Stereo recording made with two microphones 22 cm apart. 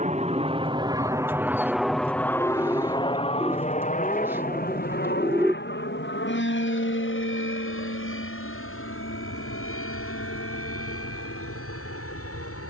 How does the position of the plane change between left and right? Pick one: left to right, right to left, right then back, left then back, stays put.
right to left.